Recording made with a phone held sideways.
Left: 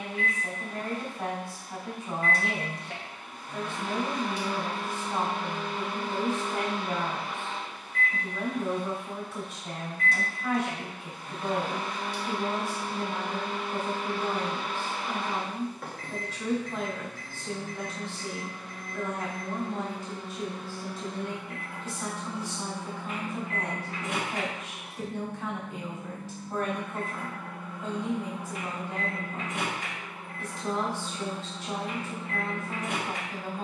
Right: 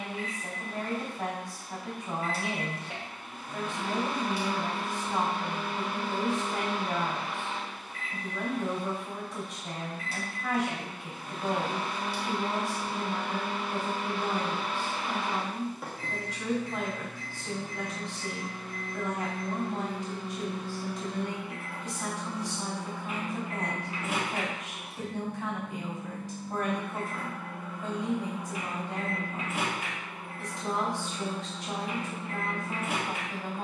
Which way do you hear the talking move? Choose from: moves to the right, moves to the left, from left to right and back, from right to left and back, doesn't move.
doesn't move.